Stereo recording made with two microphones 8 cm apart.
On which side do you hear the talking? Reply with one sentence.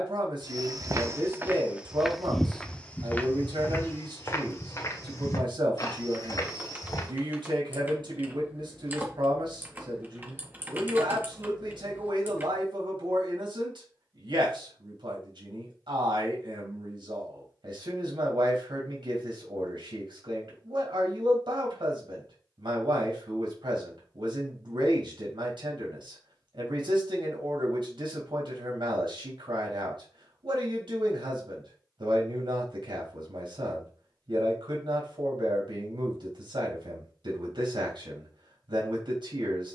You can hear the talking on the right.